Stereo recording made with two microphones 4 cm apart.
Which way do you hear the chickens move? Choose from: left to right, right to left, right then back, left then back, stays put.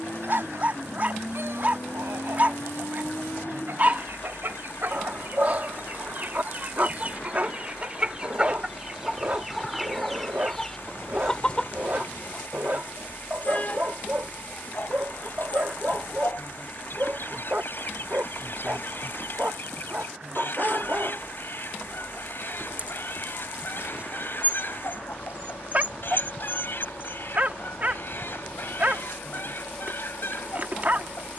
right to left.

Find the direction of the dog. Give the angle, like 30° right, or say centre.
40° right.